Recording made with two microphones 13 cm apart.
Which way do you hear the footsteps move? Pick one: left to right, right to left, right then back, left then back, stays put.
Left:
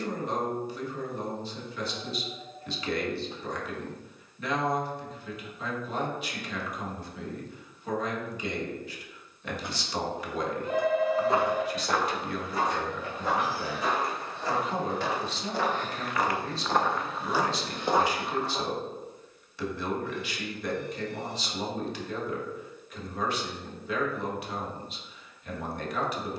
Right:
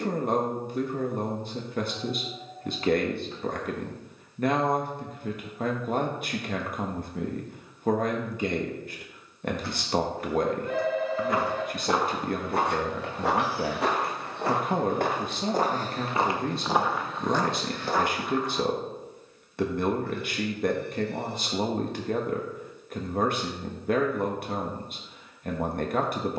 right then back.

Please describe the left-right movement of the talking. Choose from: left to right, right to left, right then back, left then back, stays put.
stays put.